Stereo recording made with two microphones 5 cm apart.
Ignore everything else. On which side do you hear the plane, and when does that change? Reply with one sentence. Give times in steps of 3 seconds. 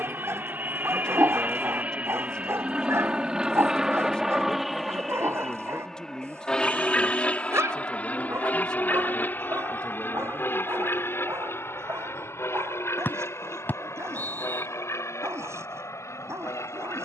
You can hear the plane on the right from 0 s, in the centre from 3 s and on the left from 6 s.